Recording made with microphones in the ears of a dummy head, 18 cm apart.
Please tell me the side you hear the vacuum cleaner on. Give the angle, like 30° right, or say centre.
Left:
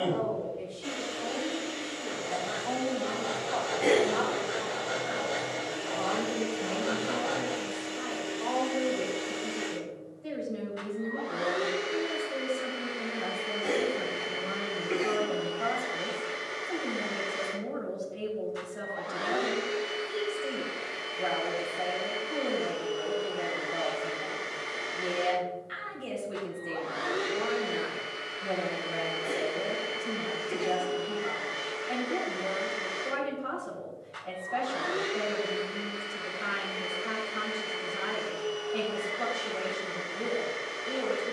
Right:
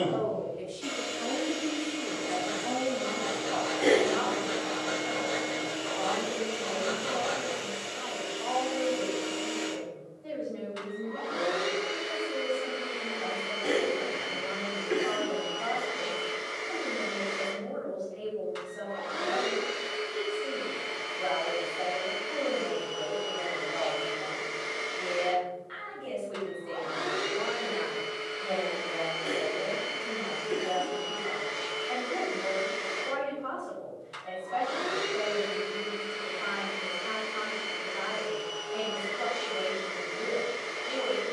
80° right.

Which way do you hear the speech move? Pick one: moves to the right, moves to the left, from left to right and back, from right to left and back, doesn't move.
moves to the left.